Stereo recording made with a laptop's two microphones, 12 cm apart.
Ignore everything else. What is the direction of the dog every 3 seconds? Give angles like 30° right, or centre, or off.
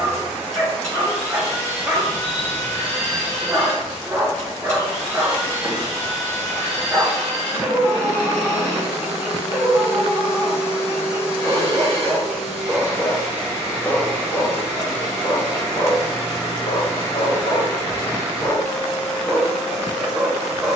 20° right, 20° right, 20° right, 20° right, 10° left, 40° left, 10° left.